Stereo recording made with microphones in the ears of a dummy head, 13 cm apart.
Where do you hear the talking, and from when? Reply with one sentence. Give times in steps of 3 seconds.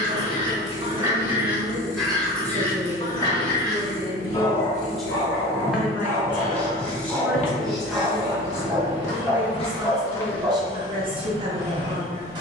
In this clip you hear the talking on the right from 0 s, in the centre from 3 s and on the right from 9 s.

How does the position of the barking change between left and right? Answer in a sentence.
You can hear the barking move from right to left and back again.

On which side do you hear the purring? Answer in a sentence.
You can hear the purring on the left.